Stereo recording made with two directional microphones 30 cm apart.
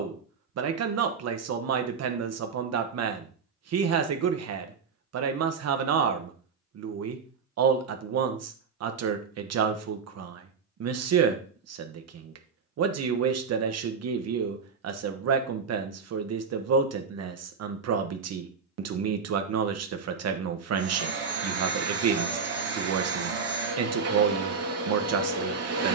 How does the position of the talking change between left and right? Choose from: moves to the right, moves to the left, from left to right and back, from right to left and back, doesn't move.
doesn't move.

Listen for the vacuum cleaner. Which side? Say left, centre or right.
right.